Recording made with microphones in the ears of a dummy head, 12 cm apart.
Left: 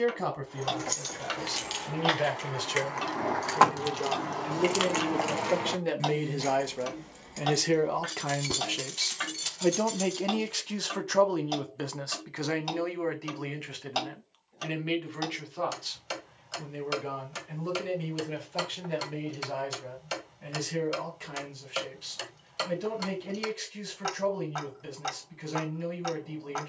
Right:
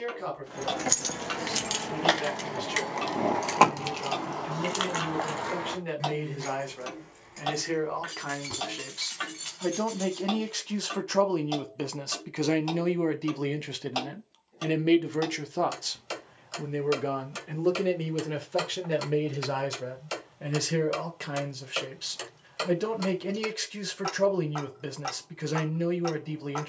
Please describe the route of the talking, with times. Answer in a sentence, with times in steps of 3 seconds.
You can hear the talking on the left from 0 s, in the centre from 9 s and on the right from 12 s.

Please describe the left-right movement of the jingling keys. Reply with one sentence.
You can hear the jingling keys move from right to left.